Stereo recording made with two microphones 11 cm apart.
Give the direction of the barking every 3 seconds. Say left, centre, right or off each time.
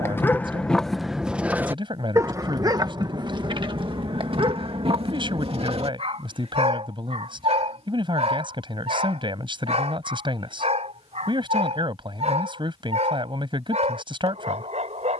centre, right, right, right, right.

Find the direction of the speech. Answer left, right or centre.
right.